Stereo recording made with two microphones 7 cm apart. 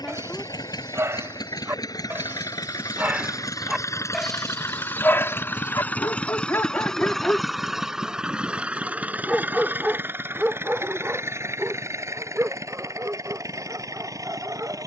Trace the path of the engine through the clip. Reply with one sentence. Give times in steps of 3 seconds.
You can hear the engine on the left from 0 s, in the centre from 6 s and on the right from 9 s.